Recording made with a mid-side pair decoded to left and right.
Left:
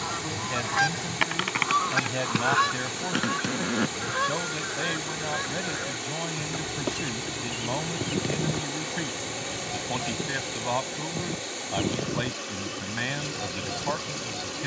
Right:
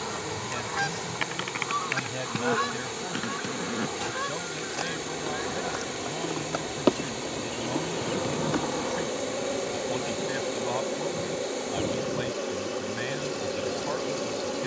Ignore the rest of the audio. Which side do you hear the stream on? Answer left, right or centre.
left.